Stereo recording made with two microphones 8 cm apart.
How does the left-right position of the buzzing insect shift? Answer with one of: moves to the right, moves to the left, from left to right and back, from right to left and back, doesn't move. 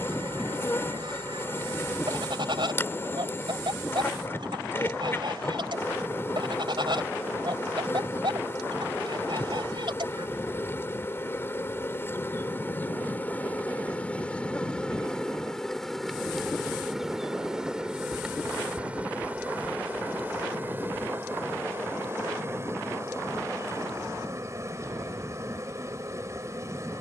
moves to the right.